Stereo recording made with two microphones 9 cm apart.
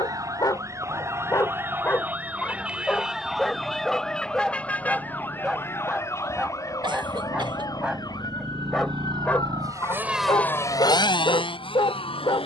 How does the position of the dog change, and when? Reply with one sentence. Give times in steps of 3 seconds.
In this clip you hear the dog on the left from 0 s, in the centre from 3 s and on the left from 9 s.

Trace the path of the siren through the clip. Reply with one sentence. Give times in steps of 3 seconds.
In this clip you hear the siren on the right from 0 s, in the centre from 3 s and on the left from 6 s.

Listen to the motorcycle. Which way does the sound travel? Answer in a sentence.
In this clip you hear the motorcycle move from right to left.